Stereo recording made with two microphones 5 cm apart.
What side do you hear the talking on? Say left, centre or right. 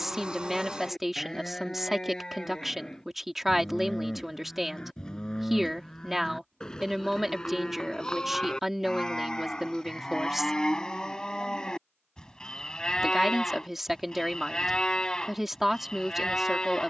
centre.